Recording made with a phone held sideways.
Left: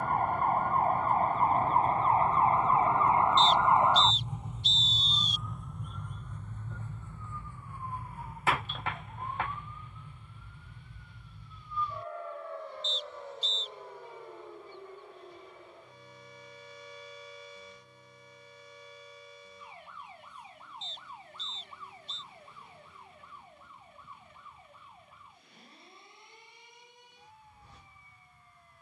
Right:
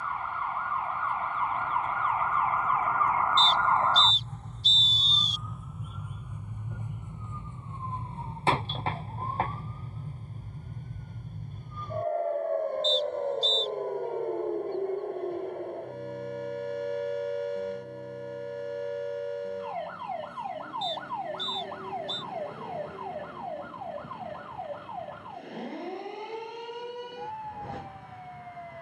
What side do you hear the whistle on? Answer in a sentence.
You can hear the whistle on the right.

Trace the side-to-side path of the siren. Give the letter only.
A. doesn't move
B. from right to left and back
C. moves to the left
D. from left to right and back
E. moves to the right
E.